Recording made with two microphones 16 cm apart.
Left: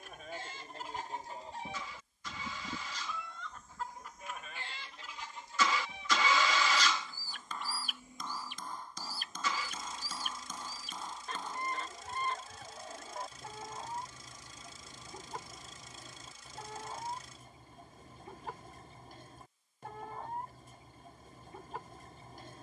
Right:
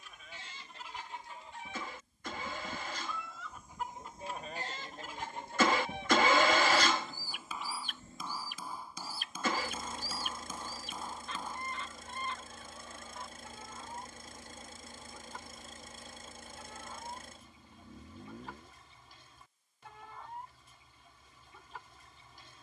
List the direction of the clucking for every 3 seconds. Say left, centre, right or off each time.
left, right, centre, left, left, left, left, left.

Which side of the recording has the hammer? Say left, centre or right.
centre.